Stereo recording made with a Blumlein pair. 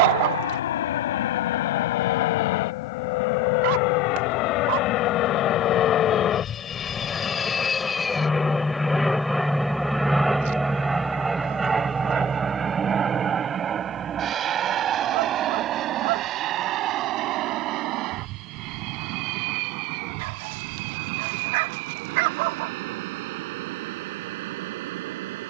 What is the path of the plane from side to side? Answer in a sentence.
In this clip you hear the plane travel towards the right.